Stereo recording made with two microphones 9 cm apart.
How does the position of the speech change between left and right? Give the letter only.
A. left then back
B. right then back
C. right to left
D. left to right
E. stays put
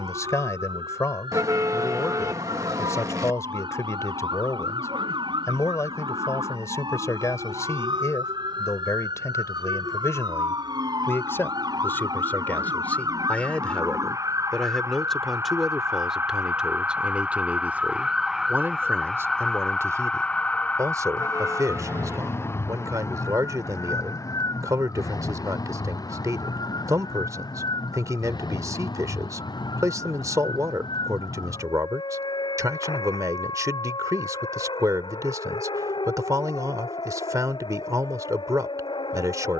D.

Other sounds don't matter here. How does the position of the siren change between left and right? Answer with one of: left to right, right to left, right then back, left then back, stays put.
right to left.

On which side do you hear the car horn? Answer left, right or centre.
right.